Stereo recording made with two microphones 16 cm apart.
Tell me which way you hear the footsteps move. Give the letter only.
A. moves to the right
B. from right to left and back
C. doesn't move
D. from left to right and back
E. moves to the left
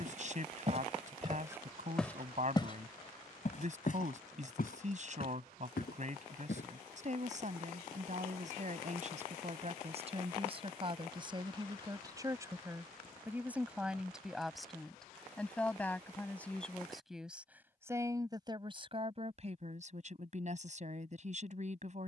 E.